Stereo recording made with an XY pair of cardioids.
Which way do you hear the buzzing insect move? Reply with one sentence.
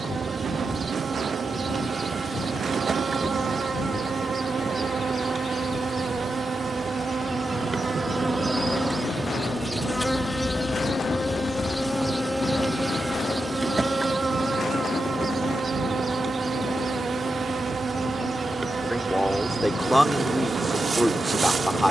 You can hear the buzzing insect move from right to left and back again.